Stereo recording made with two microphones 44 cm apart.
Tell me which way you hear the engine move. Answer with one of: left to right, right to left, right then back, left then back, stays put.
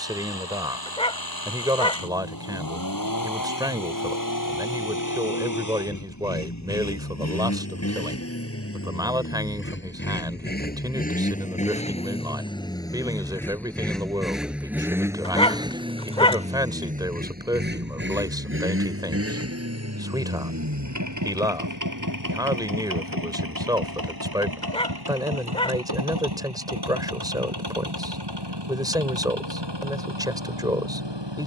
left to right.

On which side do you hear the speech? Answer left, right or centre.
centre.